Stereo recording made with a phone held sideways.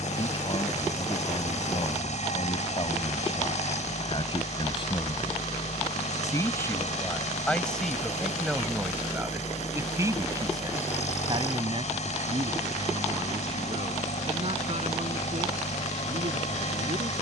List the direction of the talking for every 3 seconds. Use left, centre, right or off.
left, left, centre, right, right, right.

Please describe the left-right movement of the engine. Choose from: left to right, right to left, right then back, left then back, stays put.
stays put.